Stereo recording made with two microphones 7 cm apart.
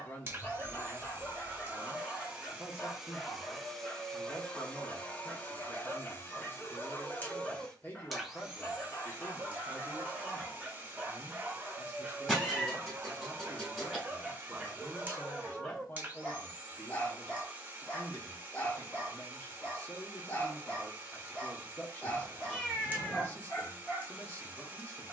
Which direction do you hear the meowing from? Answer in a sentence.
In this clip you hear the meowing in the centre.